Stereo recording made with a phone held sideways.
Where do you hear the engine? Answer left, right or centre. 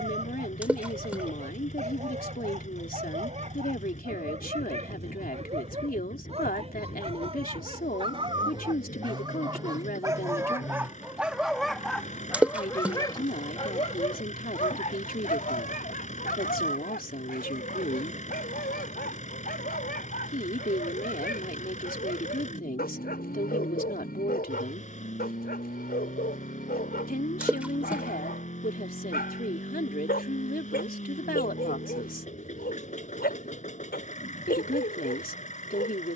left.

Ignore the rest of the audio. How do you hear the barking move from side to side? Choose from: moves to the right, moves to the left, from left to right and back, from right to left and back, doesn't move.
moves to the left.